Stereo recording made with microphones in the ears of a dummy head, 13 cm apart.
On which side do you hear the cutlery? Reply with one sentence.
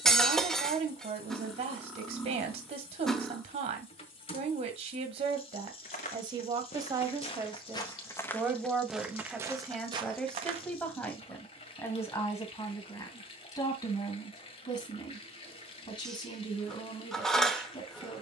You can hear the cutlery in the centre.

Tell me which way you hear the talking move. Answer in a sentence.
In this clip you hear the talking go from the right side to the left.